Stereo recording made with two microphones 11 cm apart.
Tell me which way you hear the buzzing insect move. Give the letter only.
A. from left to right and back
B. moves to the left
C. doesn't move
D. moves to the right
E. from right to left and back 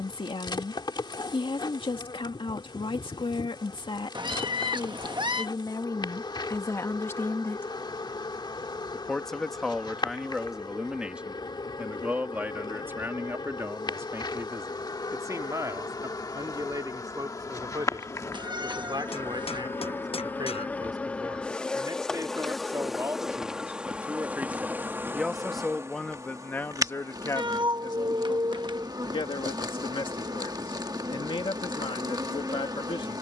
D.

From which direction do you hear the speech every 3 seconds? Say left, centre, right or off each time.
left, left, left, centre, right, right, right, right, centre, left, left.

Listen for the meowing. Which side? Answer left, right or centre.
right.